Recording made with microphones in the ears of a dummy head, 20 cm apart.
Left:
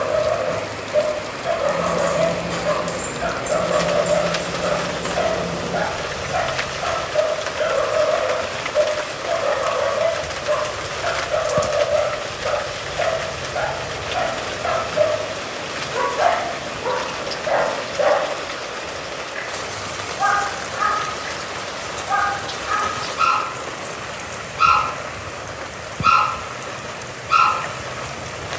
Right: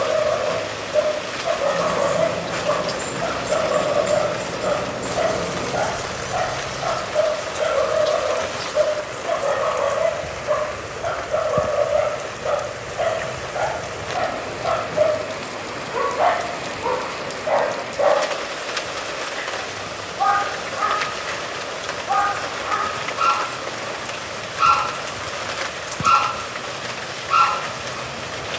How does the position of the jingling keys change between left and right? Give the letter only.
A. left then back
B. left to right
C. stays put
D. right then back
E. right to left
B.